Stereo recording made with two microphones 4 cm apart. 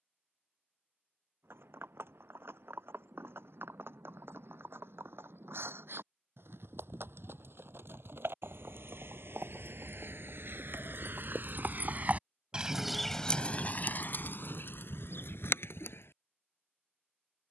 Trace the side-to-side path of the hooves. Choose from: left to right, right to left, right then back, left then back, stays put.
right to left.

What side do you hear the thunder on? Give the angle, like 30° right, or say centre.
80° right.